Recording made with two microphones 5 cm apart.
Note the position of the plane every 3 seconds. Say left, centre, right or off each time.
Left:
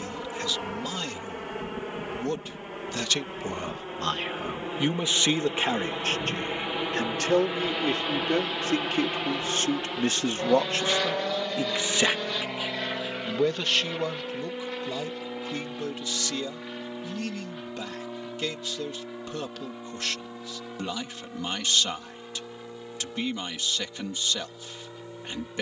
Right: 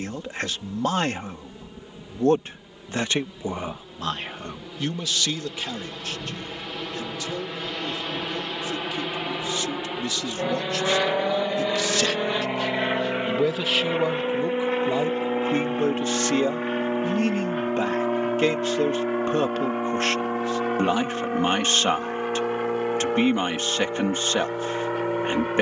left, left, centre, centre, right, right, right, right, right.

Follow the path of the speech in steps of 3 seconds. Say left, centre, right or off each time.
right, centre, left, left, centre, right, right, right, right.